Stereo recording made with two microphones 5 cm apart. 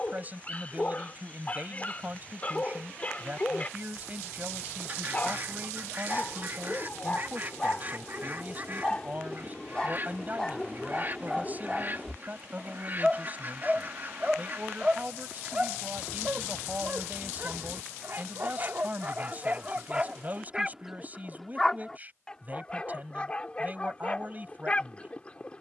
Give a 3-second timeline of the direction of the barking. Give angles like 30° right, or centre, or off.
30° left, 30° left, 30° left, 10° left, 10° right, 30° right, 30° right, 20° left, 20° left.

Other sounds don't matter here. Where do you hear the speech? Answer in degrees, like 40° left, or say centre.
30° right.